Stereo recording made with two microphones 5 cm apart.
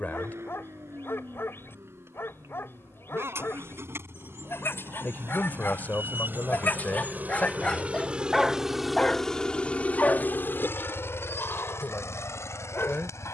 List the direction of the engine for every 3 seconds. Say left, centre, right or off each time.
right, right, right, left, left.